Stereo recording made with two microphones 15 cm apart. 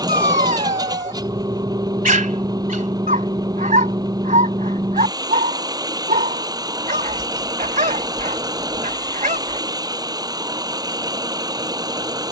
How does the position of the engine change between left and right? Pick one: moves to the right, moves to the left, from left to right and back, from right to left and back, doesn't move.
doesn't move.